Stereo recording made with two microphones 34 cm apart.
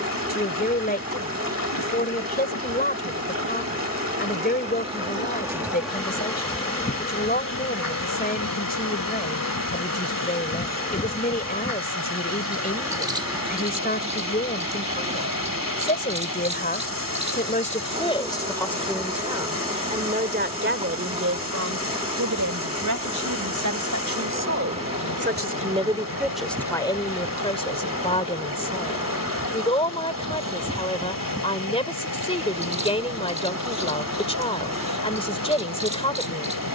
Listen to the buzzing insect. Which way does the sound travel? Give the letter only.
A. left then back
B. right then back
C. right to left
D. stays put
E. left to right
A.